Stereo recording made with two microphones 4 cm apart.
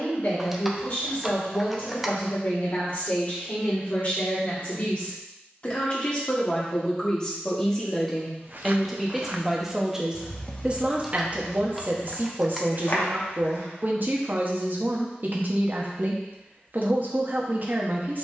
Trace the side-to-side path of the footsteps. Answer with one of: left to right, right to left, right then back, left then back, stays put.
right to left.